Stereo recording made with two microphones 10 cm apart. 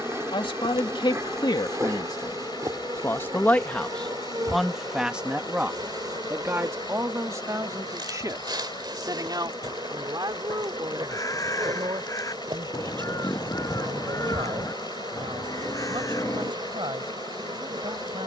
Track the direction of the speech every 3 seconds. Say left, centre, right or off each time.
left, centre, right, right, right, right.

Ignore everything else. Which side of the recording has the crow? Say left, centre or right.
left.